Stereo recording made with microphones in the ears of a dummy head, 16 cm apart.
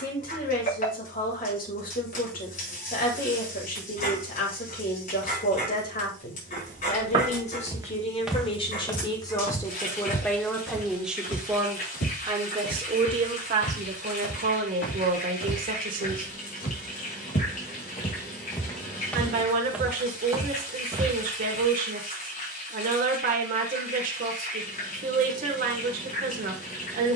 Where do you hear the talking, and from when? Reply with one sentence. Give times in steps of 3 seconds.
You can hear the talking on the left from 0 s, in the centre from 9 s and on the right from 12 s.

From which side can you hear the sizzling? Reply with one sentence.
In this clip you hear the sizzling on the left.